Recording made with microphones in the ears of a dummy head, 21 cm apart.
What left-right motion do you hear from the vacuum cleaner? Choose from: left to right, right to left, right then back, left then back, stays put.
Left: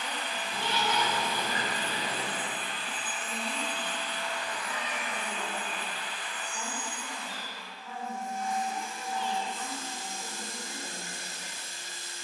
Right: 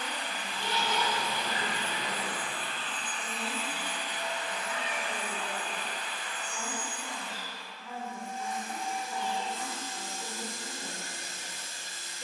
left to right.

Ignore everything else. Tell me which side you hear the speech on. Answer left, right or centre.
right.